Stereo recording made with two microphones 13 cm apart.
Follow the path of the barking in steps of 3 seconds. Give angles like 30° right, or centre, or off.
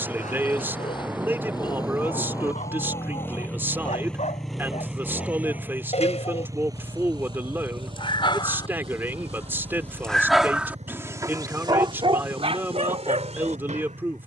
70° left, 60° left, 50° left, 10° right, 60° right.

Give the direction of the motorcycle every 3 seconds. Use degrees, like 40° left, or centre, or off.
30° left, centre, 30° right, 60° right, 70° right.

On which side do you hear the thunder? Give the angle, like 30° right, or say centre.
10° right.